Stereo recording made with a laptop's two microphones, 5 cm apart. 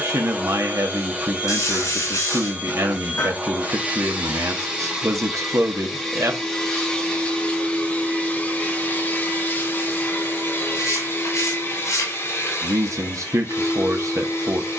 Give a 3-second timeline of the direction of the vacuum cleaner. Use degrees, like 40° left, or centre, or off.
20° right, 10° right, 20° left, 40° left, 50° left.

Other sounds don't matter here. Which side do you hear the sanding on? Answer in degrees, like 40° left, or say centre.
70° left.